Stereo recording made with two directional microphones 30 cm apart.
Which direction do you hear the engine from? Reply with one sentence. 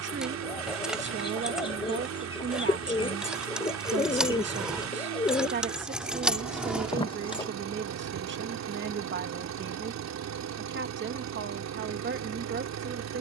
In this clip you hear the engine on the right.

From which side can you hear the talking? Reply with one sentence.
In this clip you hear the talking on the right.